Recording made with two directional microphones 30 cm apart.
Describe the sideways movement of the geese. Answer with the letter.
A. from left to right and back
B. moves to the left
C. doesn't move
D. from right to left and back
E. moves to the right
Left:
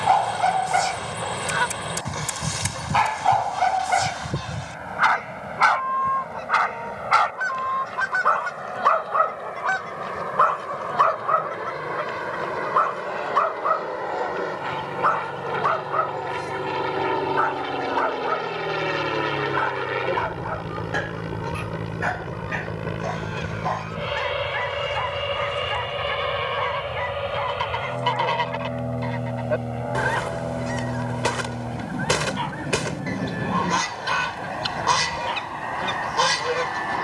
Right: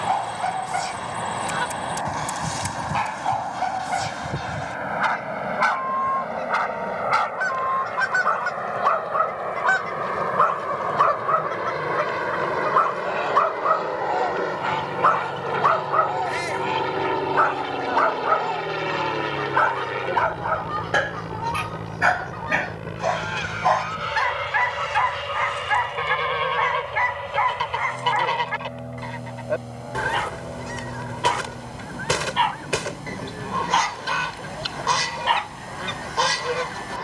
A.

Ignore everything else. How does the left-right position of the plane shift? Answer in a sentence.
You can hear the plane go from the right side to the left.